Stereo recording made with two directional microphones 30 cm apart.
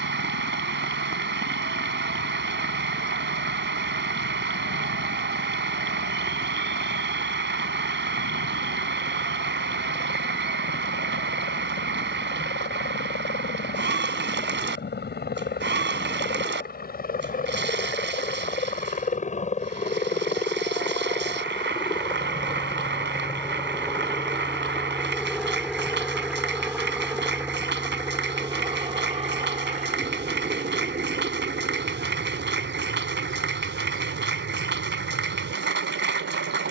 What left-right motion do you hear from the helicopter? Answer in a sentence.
In this clip you hear the helicopter move from left to right.